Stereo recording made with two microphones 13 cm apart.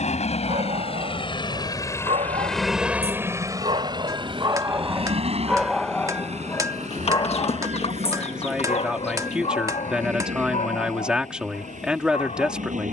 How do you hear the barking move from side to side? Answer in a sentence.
You can hear the barking travel towards the left.